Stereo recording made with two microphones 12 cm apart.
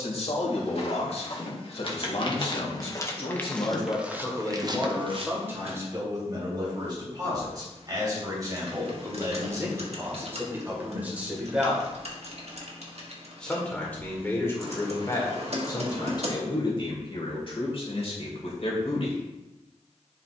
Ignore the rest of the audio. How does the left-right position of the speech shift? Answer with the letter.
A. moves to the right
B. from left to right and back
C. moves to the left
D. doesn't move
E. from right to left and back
B.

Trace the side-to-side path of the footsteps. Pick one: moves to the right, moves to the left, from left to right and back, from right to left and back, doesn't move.
moves to the right.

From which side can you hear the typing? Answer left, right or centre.
right.